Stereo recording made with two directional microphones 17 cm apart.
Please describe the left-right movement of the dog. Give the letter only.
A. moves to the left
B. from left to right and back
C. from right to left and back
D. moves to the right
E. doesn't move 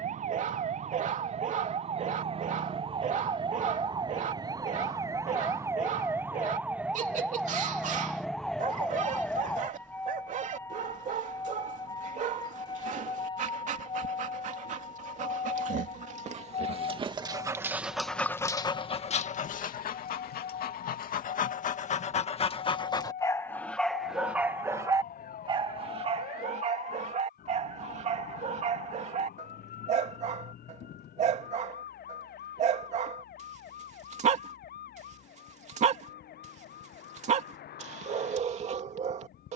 C.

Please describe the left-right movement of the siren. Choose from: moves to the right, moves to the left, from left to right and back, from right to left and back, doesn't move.
moves to the left.